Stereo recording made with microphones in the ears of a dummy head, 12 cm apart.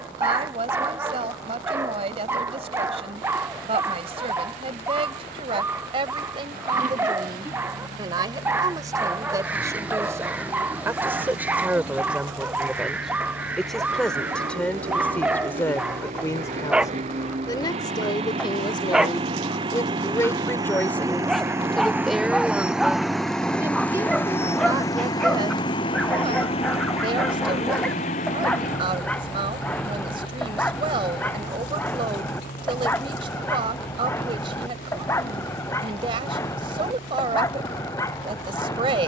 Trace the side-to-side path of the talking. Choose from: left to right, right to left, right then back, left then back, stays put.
left then back.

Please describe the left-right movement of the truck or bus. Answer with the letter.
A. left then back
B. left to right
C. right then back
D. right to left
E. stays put
D.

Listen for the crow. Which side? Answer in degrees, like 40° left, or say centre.
10° right.